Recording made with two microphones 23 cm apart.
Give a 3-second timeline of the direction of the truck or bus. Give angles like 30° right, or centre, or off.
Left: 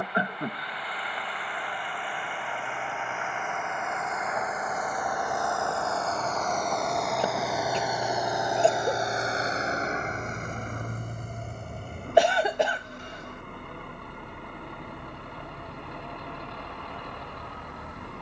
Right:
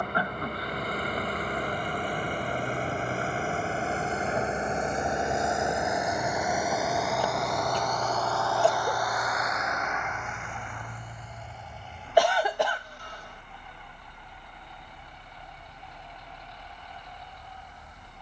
50° right, 30° right, centre, 40° left, 70° left, 80° left.